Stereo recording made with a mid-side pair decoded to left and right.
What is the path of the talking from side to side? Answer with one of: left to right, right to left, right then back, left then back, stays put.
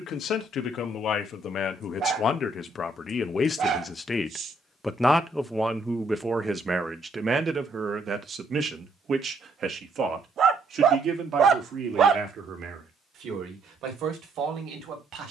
left to right.